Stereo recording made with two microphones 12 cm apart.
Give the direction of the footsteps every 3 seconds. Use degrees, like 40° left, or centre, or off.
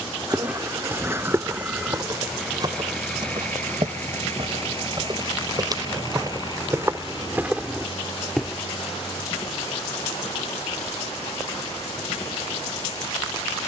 20° right, 40° right, 20° right, off, off.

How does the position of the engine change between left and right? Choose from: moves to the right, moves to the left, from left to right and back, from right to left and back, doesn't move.
moves to the left.